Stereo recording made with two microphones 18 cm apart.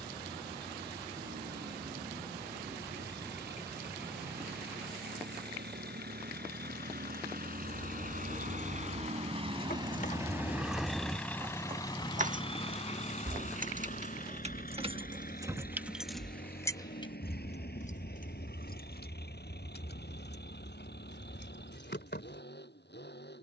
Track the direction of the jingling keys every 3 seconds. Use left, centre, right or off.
off, off, left, left, right, centre, left, left.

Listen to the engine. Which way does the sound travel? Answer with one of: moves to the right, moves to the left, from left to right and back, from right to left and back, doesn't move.
moves to the left.